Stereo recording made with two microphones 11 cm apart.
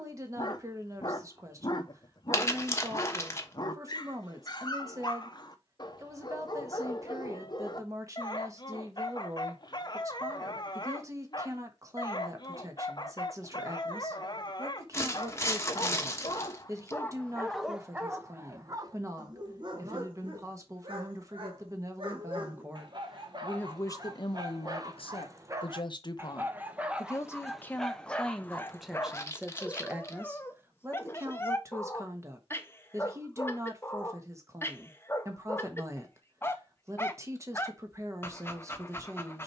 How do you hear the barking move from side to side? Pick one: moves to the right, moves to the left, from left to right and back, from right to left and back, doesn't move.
from left to right and back.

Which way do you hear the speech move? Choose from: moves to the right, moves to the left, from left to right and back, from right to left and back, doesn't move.
from right to left and back.